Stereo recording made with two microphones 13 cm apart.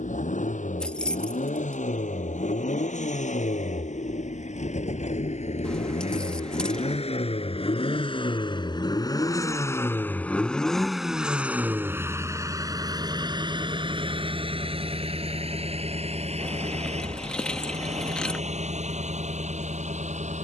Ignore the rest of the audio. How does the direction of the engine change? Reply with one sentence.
In this clip you hear the engine go from the left side to the right.